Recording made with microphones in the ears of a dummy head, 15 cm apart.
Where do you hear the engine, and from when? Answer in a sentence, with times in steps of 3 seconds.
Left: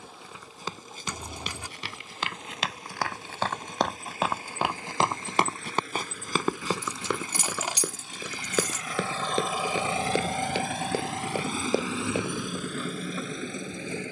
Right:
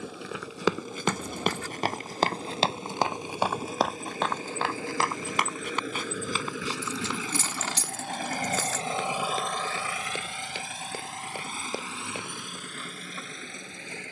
In this clip you hear the engine on the right from 0 s and on the left from 9 s.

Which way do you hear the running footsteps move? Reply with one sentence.
You can hear the running footsteps move to the left.